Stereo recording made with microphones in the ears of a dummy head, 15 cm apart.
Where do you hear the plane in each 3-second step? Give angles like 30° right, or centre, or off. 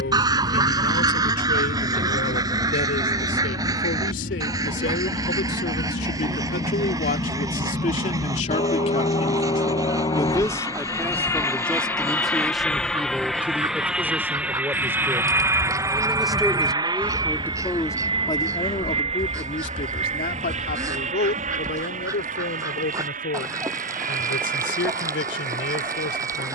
70° left, 60° left, 40° left, 20° left, centre, 20° right, 40° right, 50° right, 50° right.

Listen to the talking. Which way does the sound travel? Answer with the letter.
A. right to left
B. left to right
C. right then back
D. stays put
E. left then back
C.